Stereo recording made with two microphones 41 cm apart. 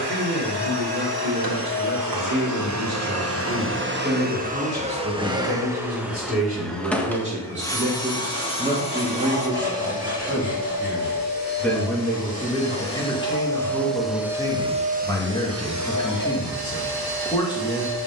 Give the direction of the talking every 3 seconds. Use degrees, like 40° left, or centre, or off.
30° right, 20° right, 20° right, centre, 10° left, 10° left.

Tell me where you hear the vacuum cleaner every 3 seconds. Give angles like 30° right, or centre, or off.
60° right, 20° right, 10° left, 20° left, centre, 50° right.